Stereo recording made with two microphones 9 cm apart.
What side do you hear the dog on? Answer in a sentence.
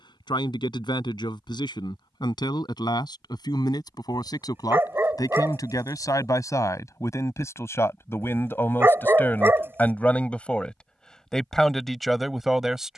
In this clip you hear the dog on the right.